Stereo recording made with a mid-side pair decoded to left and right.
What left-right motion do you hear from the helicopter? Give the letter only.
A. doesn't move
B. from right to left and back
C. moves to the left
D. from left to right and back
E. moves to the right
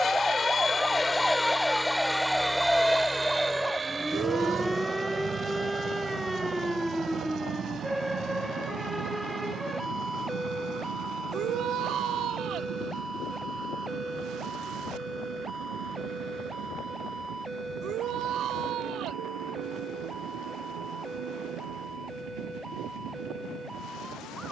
E.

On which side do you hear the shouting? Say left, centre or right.
right.